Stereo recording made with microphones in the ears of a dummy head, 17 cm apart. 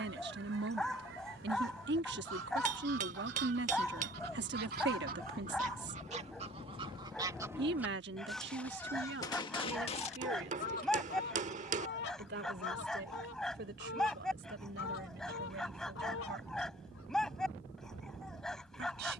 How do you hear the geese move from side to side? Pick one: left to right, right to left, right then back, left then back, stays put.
right to left.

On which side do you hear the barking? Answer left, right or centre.
centre.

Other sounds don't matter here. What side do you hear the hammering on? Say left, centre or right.
right.